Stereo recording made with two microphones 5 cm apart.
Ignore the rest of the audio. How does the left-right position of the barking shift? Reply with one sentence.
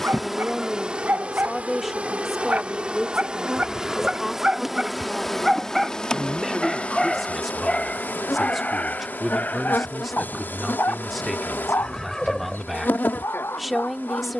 You can hear the barking move from right to left.